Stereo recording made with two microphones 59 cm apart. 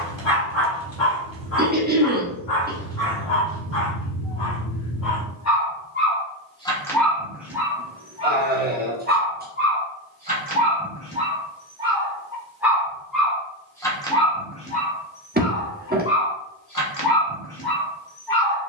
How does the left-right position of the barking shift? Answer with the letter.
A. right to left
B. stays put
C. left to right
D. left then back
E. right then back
E.